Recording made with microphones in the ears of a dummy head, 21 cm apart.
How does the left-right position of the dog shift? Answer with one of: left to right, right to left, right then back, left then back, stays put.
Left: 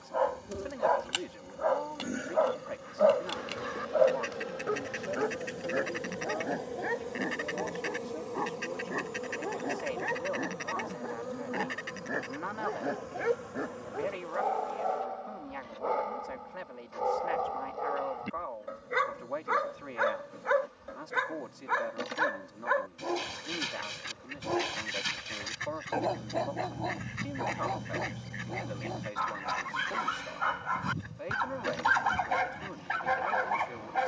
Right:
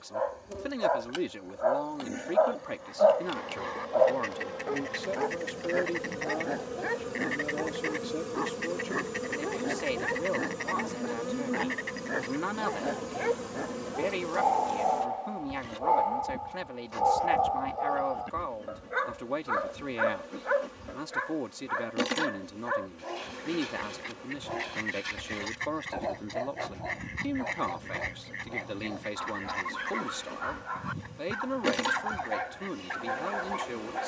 right then back.